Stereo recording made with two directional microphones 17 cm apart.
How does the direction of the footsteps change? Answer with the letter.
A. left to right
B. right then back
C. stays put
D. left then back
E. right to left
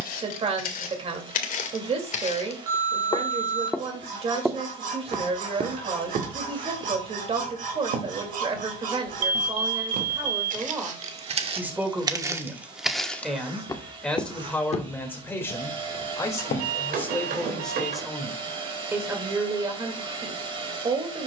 B.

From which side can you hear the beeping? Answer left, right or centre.
right.